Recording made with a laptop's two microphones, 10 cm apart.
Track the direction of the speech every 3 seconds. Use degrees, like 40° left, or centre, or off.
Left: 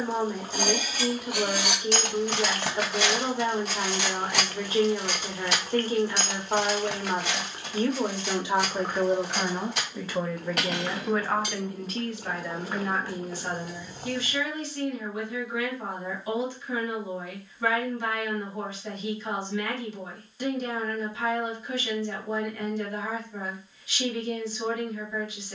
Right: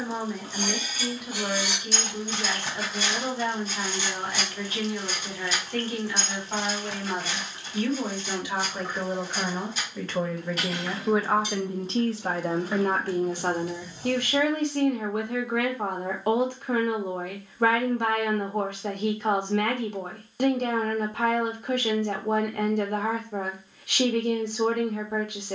30° left, 30° left, 30° left, centre, 50° right, 60° right, 60° right, 60° right, 60° right.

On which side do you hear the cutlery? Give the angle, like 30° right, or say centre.
70° left.